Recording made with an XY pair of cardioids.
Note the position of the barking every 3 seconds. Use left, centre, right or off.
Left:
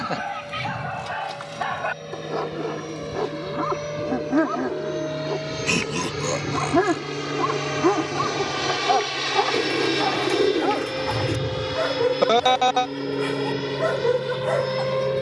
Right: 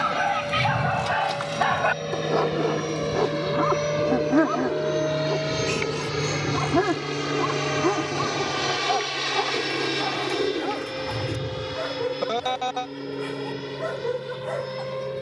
right, centre, left, left, left.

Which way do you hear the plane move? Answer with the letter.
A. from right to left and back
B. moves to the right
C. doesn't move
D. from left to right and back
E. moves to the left
E.